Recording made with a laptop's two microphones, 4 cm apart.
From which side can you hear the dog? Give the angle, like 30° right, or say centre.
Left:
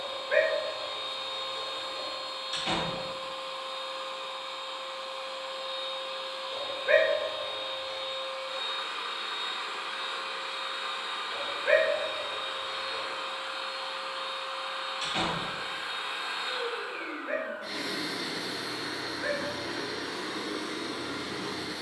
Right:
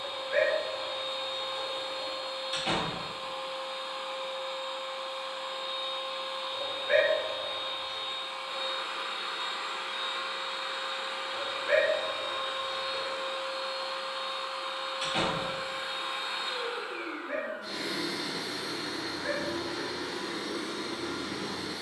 60° left.